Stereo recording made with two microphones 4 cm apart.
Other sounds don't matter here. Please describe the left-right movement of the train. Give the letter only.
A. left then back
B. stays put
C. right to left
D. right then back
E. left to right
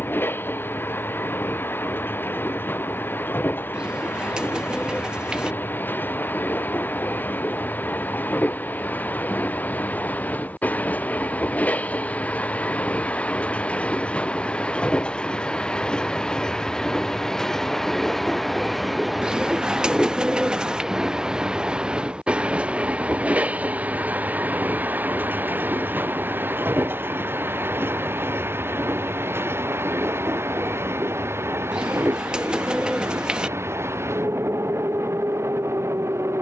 E.